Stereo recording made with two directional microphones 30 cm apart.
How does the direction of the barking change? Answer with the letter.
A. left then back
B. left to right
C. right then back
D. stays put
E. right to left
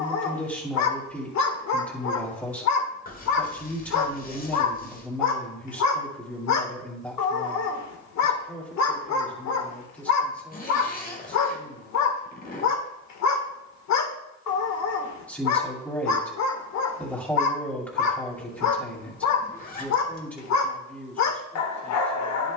D.